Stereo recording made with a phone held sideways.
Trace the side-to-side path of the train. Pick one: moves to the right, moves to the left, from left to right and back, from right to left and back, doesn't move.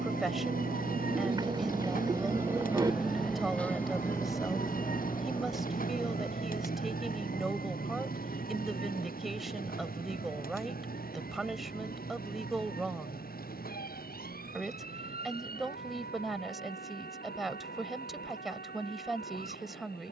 moves to the left.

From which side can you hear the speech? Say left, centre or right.
centre.